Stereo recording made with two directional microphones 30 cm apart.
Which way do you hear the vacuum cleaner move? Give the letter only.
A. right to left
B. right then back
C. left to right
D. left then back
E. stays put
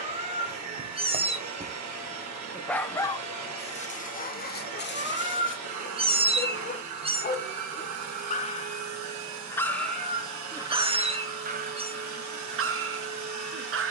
E.